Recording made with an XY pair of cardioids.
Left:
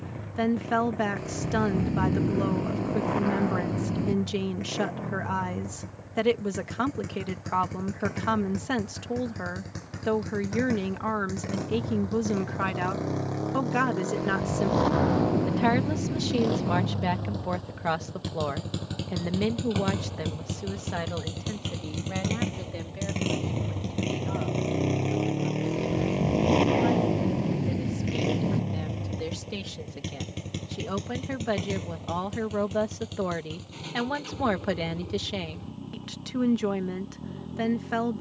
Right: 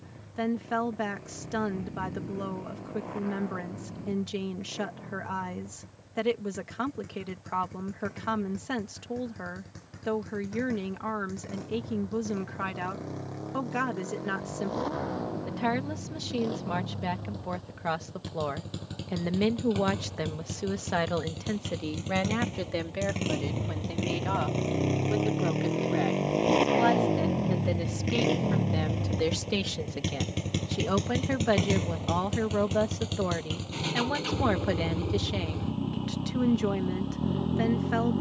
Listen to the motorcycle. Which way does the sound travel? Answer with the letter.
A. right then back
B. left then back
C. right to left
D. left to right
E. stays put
D.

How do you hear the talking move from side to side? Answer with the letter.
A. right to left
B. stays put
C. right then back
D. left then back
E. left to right
C.